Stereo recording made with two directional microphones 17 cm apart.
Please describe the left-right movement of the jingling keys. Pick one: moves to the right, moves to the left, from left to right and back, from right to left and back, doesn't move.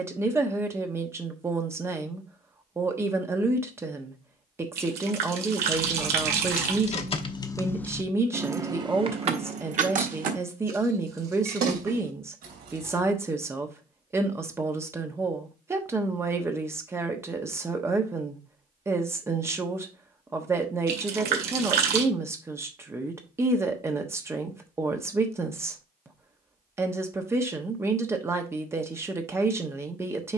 moves to the right.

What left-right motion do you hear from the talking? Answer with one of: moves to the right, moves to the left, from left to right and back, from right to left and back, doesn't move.
doesn't move.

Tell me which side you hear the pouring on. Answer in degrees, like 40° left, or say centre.
70° right.